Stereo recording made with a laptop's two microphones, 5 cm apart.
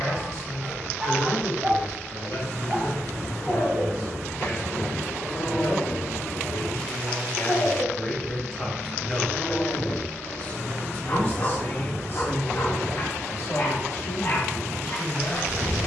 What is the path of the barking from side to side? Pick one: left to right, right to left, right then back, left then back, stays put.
right to left.